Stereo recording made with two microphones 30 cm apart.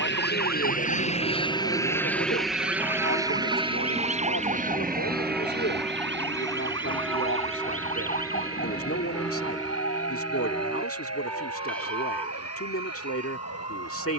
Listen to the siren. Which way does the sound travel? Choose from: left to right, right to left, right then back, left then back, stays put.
right to left.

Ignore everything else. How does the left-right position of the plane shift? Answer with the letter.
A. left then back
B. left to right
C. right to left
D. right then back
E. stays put
B.